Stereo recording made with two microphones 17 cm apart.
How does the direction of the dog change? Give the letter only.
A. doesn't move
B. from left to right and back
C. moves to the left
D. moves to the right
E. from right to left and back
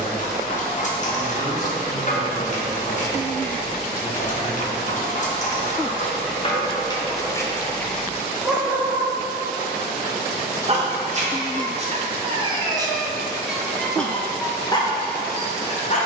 B.